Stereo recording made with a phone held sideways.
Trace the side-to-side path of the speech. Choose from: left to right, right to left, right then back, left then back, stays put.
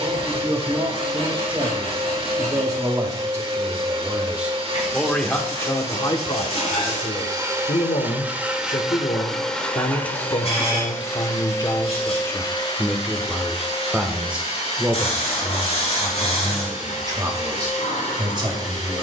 left then back.